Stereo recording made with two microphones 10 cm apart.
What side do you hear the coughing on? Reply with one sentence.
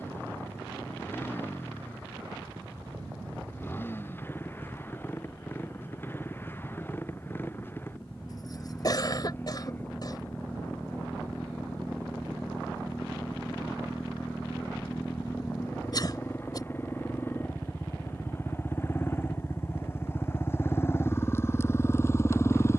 In this clip you hear the coughing on the left.